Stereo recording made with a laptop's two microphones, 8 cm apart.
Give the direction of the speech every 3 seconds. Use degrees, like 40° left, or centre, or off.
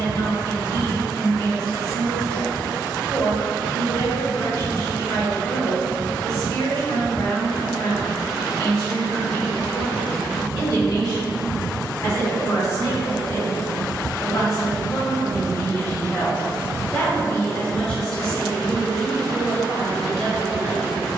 60° left, 60° left, 60° left, 60° left, 50° left, 30° left, centre.